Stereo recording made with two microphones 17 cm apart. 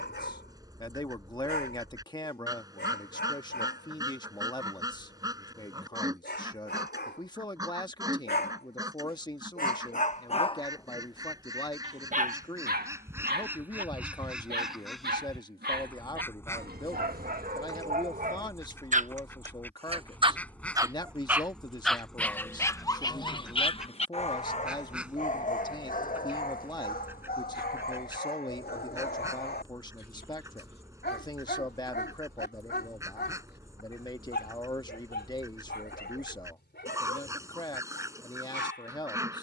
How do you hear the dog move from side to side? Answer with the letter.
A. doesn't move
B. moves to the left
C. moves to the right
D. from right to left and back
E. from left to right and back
E.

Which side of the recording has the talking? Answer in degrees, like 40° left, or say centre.
20° left.